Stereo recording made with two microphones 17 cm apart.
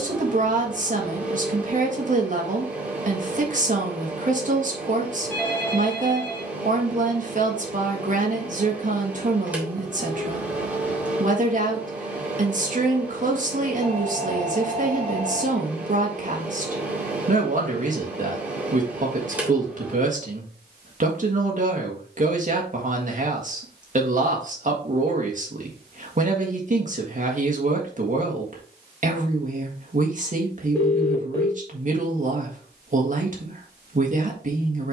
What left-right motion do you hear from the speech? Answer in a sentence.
In this clip you hear the speech stay in one place.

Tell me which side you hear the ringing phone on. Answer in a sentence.
In this clip you hear the ringing phone in the centre.